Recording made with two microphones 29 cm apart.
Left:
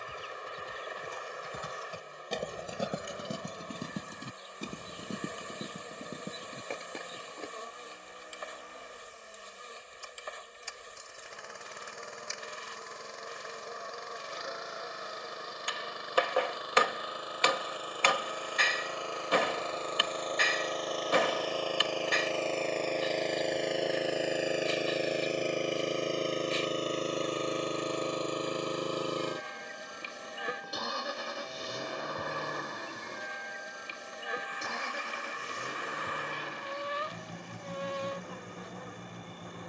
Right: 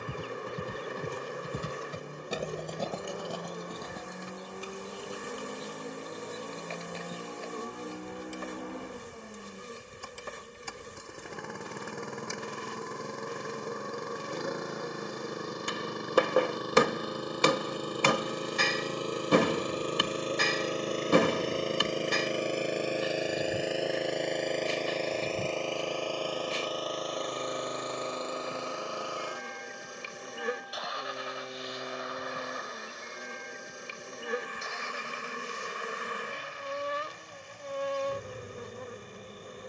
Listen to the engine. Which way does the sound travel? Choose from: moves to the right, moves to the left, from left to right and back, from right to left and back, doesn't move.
moves to the left.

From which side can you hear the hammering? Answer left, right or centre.
right.